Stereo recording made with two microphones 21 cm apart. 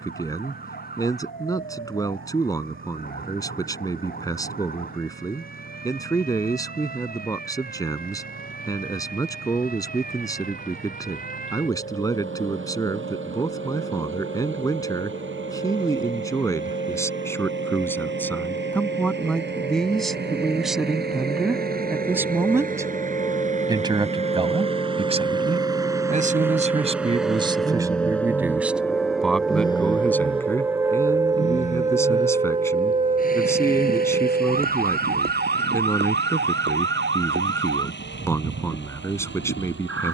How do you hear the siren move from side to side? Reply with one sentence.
You can hear the siren move from left to right.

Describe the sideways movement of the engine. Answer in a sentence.
In this clip you hear the engine move from right to left.